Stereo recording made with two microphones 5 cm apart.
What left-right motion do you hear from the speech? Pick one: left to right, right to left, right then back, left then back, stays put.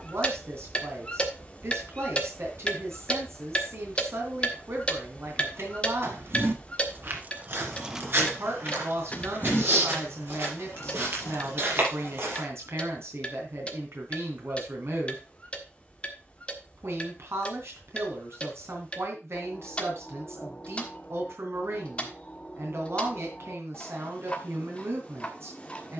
stays put.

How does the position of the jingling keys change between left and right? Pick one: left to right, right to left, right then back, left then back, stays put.
right to left.